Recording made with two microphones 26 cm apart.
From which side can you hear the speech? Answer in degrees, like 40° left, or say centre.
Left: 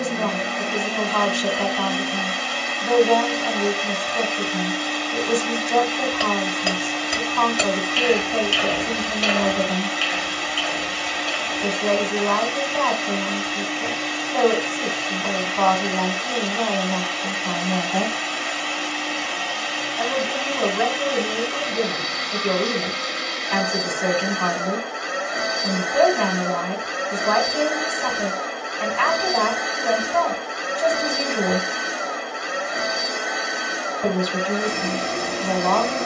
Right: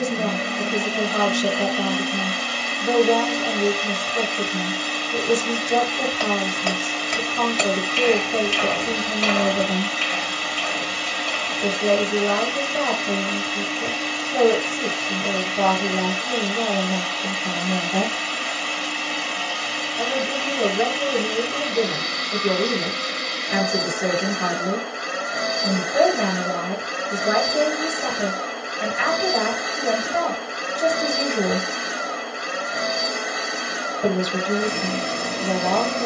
20° right.